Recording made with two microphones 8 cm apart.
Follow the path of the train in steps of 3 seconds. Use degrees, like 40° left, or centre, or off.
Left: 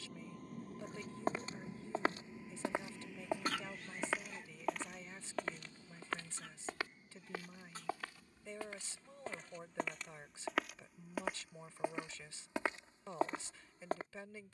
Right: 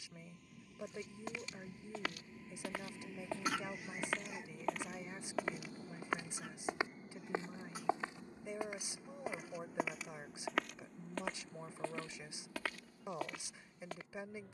30° left, 20° right, 50° right, 60° right, 60° right.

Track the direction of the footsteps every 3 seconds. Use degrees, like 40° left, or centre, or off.
40° left, centre, 20° right, centre, 30° left.